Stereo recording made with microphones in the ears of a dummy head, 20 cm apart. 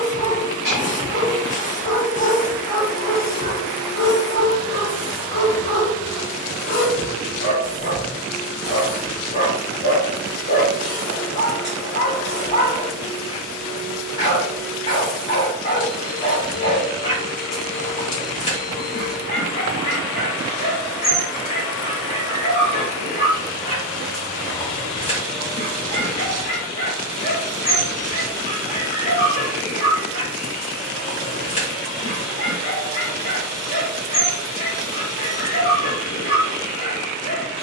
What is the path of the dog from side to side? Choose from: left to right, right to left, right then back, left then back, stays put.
stays put.